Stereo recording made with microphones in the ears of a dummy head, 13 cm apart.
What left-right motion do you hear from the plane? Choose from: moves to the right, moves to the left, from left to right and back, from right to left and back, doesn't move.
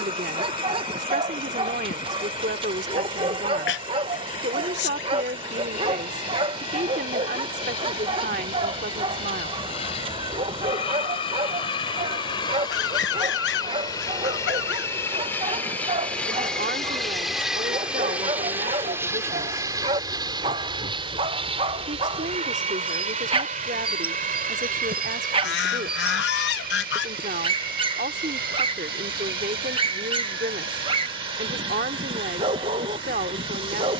moves to the right.